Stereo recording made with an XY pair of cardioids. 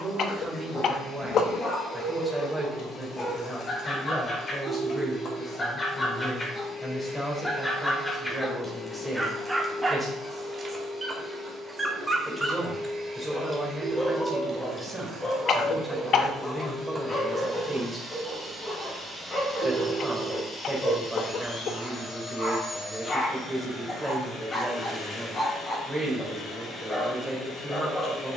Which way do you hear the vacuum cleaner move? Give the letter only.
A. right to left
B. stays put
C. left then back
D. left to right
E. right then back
E.